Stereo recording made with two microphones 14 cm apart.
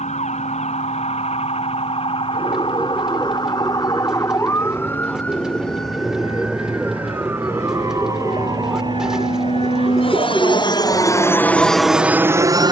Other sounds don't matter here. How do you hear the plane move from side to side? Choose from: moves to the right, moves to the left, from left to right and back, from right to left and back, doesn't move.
moves to the right.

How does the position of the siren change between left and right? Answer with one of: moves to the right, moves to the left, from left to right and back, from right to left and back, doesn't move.
moves to the right.